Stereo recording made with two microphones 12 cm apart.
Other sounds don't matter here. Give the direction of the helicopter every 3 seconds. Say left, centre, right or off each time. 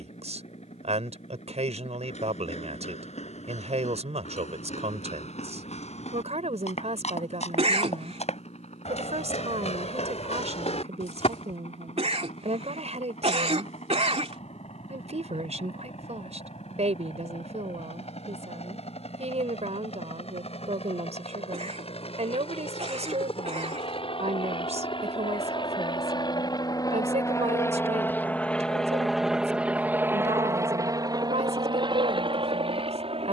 left, left, left, left, left, left, left, left, left, centre, right.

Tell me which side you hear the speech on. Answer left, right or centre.
right.